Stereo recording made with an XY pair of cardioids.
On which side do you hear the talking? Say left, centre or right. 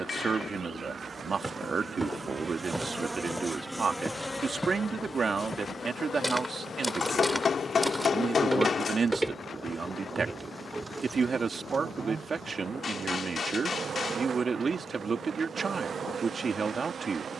right.